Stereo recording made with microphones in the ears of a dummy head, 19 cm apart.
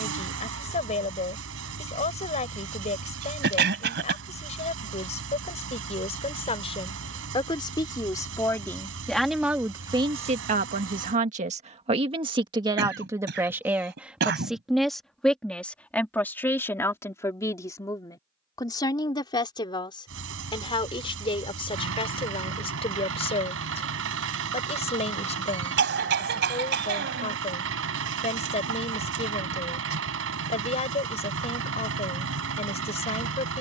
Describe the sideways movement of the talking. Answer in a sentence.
In this clip you hear the talking move from left to right and back again.